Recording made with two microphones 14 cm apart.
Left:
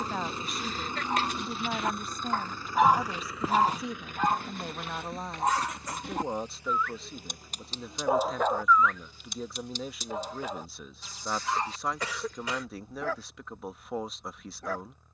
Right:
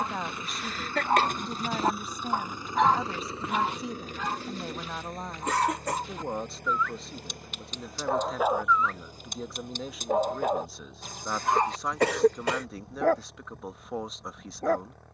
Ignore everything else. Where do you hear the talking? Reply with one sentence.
In this clip you hear the talking in the centre.